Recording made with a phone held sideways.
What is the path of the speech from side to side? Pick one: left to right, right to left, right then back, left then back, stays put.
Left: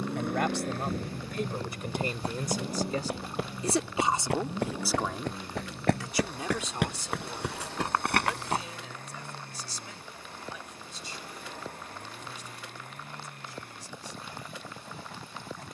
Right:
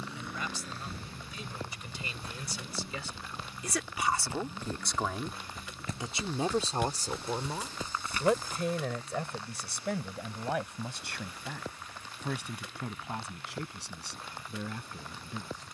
left to right.